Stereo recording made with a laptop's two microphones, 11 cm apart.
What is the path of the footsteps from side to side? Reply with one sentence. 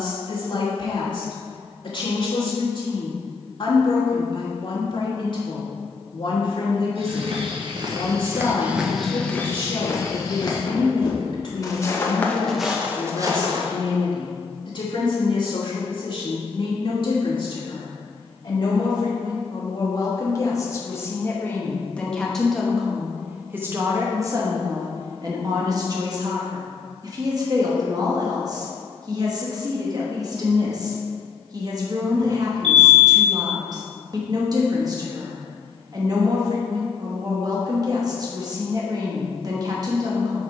You can hear the footsteps go left and come back.